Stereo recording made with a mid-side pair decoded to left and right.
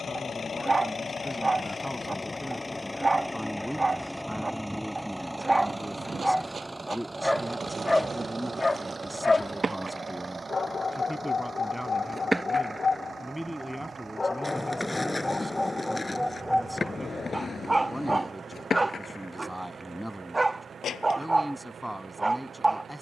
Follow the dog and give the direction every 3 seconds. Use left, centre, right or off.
right, right, centre, left, left, centre, right, right.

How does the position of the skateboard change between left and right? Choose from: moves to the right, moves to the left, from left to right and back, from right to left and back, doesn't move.
moves to the left.